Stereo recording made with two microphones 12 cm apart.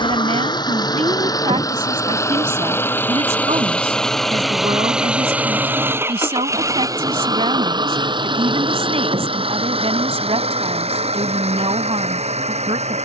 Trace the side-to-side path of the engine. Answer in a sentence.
In this clip you hear the engine travel towards the right.